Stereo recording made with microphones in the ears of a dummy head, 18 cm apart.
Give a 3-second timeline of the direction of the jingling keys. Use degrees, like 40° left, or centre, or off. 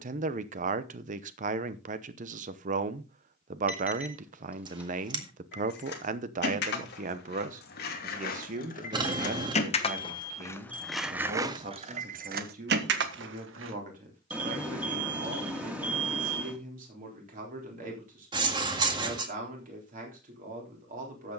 off, 60° left, 50° left, 10° left, 60° right, off, off.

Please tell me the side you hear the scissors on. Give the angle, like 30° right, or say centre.
20° right.